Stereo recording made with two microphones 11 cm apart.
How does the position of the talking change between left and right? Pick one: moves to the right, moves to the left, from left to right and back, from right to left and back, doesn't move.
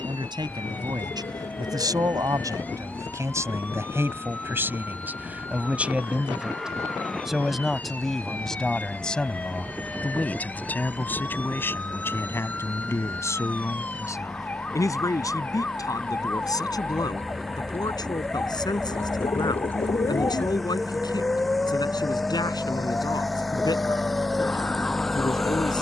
moves to the left.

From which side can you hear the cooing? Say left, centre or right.
left.